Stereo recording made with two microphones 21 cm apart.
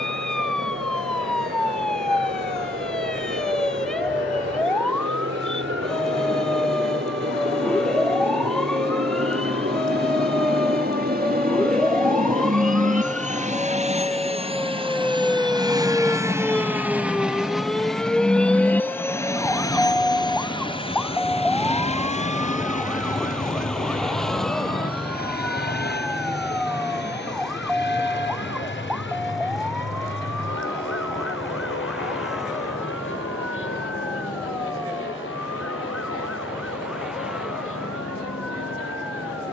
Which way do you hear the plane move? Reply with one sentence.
You can hear the plane move to the left.